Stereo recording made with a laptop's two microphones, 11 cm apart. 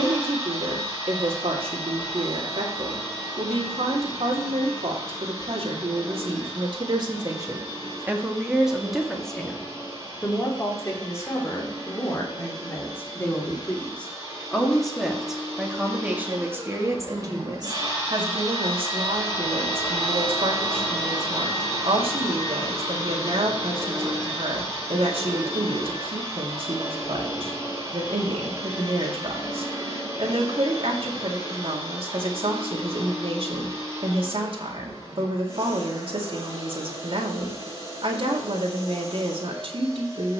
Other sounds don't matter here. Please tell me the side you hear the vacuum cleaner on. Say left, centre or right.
right.